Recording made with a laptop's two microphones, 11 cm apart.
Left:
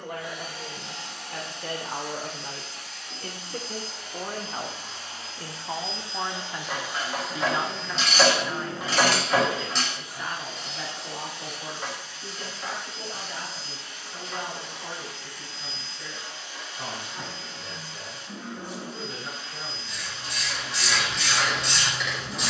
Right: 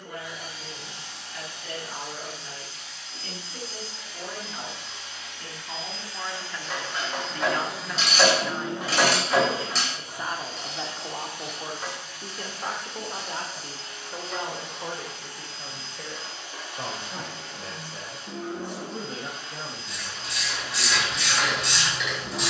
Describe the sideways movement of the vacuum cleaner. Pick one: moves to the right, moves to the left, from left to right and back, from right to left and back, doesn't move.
moves to the right.